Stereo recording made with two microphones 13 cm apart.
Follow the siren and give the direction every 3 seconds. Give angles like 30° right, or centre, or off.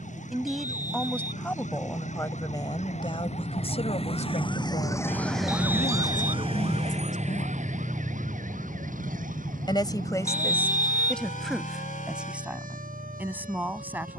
70° left, 30° left, 60° right, 80° right, 80° right.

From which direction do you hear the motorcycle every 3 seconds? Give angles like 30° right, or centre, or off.
80° right, 50° right, 10° left, 50° left, 60° left.